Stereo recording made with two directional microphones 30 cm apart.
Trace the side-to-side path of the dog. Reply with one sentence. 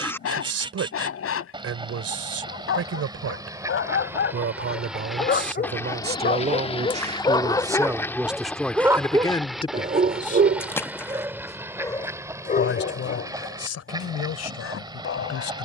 In this clip you hear the dog move from left to right and back again.